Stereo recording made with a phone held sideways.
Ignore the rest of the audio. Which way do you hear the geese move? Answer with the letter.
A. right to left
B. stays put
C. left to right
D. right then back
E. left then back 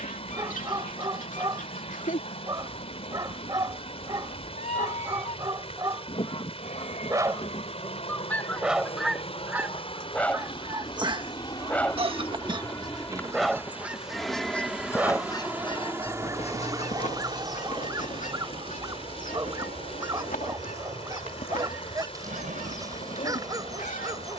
D.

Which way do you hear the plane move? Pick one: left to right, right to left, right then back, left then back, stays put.
left to right.